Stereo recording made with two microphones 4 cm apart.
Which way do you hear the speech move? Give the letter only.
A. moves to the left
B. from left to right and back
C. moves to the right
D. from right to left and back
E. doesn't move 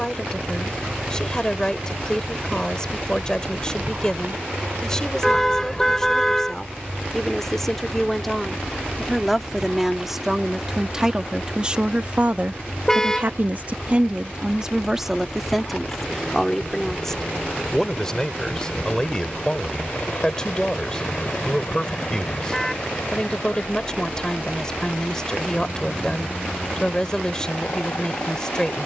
B.